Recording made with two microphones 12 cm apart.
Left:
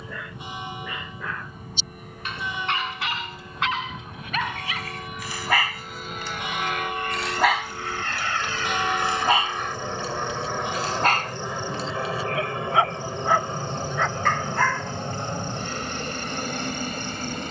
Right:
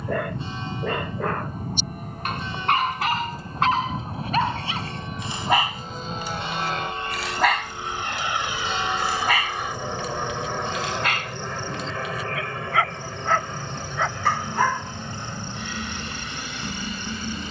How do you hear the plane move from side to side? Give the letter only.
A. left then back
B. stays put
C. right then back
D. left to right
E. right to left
E.